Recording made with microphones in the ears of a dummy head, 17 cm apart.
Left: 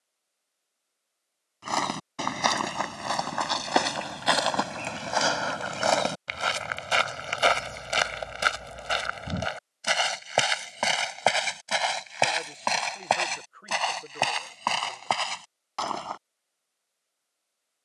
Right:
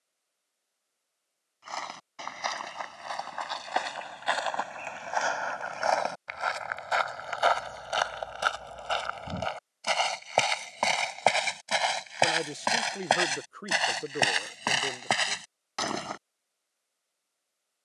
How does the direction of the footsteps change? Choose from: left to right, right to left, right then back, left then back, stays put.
left to right.